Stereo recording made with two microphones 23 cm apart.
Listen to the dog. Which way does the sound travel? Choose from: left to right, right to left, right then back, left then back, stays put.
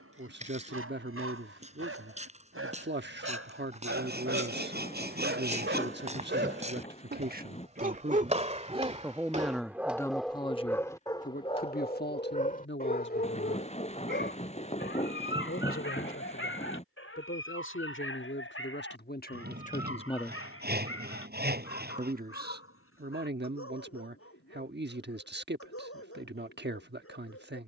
right to left.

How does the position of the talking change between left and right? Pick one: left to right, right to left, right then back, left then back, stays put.
left then back.